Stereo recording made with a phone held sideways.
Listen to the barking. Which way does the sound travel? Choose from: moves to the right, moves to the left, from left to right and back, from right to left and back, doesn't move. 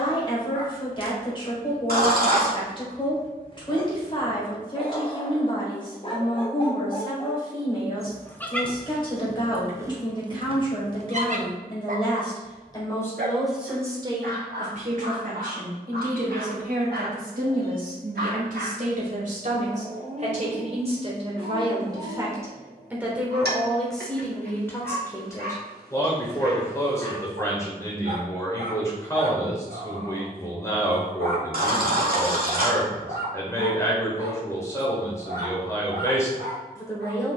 moves to the right.